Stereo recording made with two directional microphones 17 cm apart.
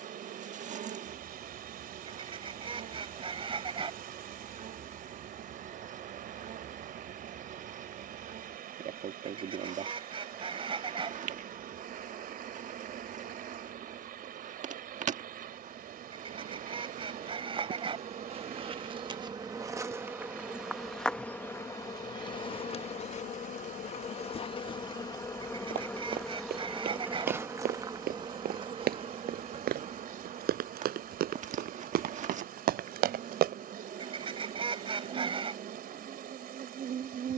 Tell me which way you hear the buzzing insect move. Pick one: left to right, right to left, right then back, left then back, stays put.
left then back.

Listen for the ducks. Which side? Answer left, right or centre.
right.